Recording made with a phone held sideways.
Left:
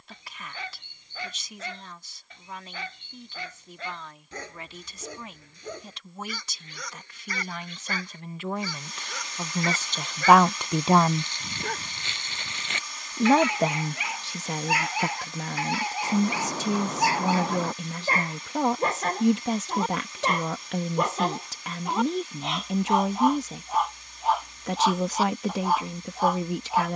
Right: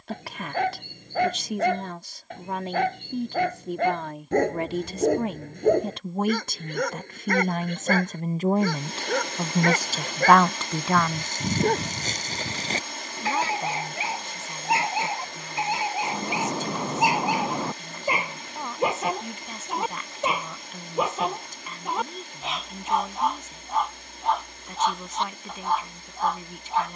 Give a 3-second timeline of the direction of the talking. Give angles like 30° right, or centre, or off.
60° right, 60° right, 50° right, centre, 70° left, 80° left, 80° left, 80° left, 80° left.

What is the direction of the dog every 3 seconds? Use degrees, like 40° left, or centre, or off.
50° right, 50° right, 50° right, 50° right, 30° right, 20° right, 10° right, centre, centre.